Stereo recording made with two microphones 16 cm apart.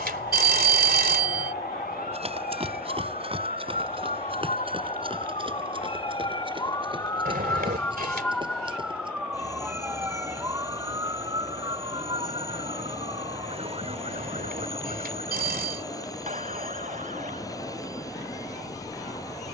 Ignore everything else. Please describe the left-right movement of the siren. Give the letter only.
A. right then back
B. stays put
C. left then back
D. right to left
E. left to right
E.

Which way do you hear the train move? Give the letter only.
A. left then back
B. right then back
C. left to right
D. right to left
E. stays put
E.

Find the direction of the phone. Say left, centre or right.
right.